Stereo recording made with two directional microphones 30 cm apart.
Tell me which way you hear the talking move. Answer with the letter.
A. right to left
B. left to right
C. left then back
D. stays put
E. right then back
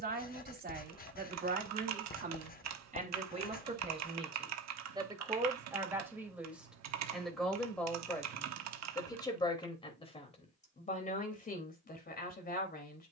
A.